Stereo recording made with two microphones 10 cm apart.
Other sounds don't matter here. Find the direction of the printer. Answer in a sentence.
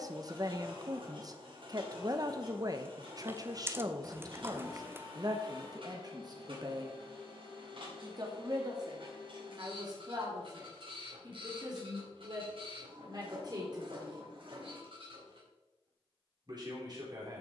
You can hear the printer on the right.